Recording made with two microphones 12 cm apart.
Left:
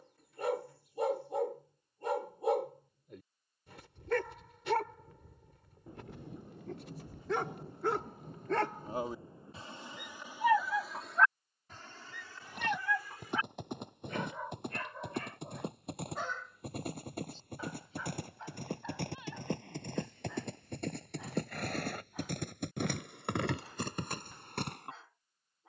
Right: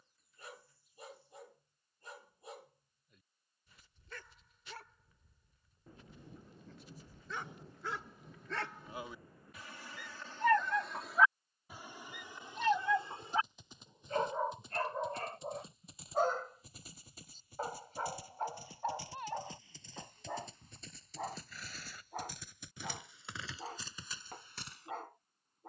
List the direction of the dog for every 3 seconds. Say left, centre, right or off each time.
left, left, left, centre, right, right, right, right, right.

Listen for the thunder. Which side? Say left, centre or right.
left.